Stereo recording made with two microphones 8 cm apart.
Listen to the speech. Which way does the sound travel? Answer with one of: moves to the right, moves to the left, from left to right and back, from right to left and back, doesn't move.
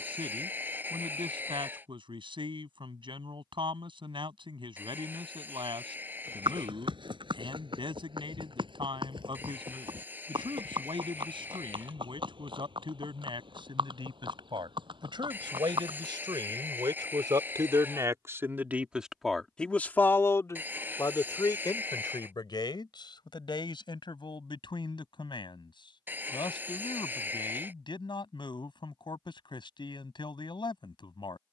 moves to the left.